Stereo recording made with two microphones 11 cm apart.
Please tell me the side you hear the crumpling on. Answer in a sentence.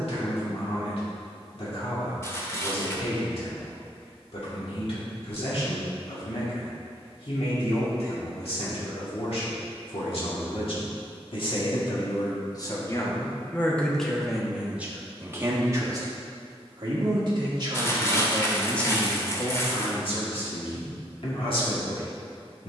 You can hear the crumpling on the left.